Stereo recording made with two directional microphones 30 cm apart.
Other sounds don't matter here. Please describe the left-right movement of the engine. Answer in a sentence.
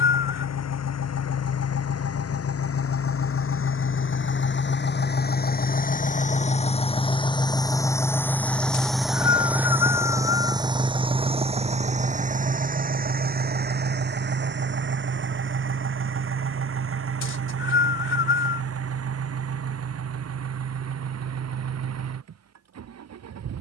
You can hear the engine travel towards the right.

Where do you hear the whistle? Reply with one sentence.
You can hear the whistle on the left.